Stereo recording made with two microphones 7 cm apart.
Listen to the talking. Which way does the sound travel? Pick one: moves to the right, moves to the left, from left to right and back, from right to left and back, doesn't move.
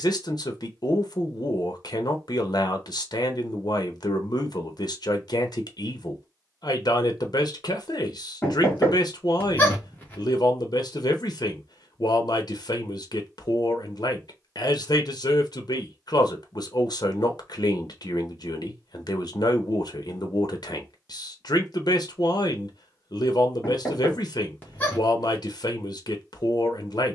doesn't move.